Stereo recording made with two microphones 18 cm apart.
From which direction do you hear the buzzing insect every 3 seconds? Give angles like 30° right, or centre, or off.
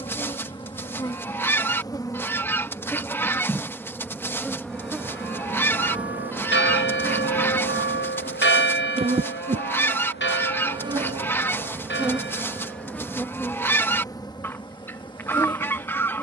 20° left, centre, 20° right, 30° right, 10° left, 20° left.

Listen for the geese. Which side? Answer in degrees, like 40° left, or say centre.
10° left.